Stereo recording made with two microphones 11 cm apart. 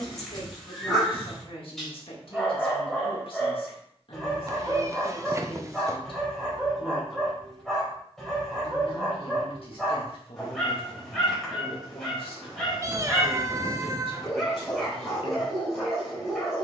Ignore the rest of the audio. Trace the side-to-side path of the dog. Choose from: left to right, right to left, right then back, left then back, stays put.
stays put.